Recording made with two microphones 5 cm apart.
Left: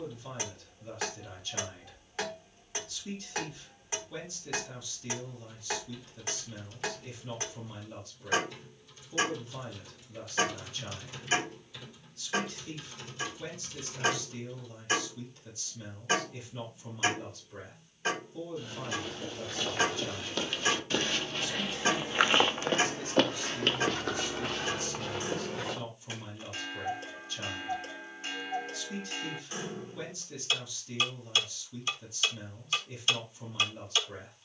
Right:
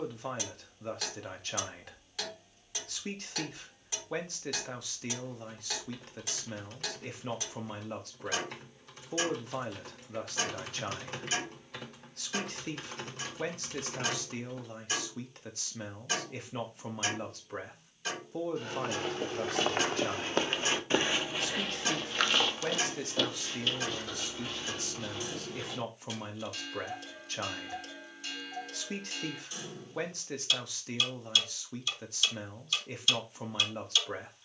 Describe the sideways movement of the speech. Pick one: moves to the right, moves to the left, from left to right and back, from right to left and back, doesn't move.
doesn't move.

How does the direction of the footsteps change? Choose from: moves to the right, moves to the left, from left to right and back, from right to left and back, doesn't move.
moves to the left.